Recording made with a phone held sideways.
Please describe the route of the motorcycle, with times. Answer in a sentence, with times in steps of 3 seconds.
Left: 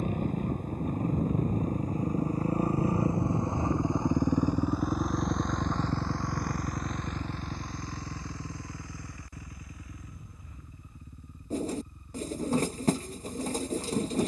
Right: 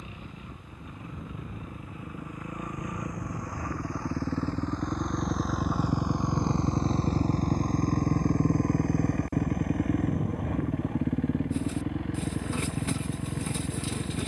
In this clip you hear the motorcycle on the left from 0 s, in the centre from 3 s and on the right from 6 s.